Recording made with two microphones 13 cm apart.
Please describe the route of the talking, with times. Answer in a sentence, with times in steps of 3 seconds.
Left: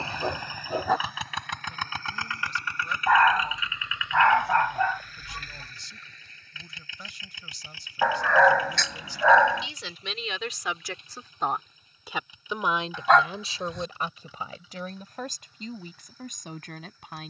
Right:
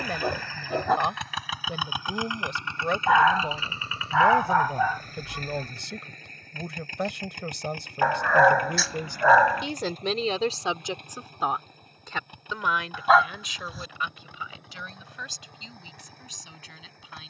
You can hear the talking on the right from 0 s and on the left from 12 s.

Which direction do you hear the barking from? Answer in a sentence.
You can hear the barking in the centre.